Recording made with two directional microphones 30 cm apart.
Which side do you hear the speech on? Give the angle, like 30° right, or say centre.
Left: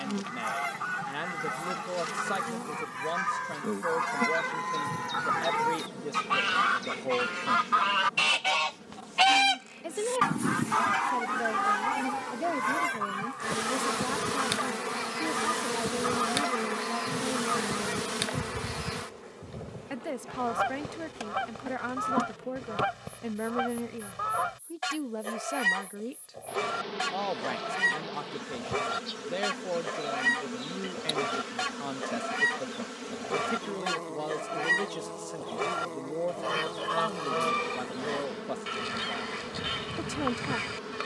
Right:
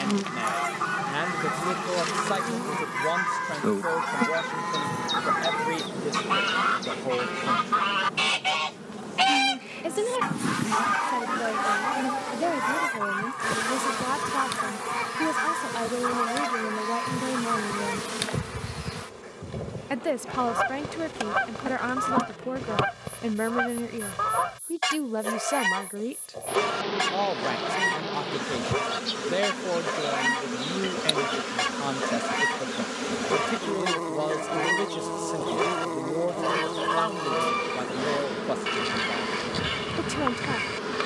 40° right.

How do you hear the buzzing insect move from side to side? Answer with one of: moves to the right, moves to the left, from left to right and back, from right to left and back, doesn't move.
from right to left and back.